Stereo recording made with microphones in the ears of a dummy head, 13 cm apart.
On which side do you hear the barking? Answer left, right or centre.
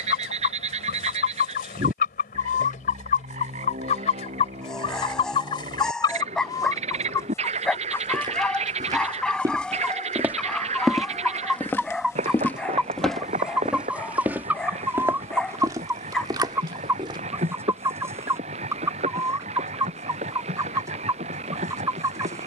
centre.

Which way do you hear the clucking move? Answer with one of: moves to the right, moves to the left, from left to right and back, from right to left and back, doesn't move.
moves to the right.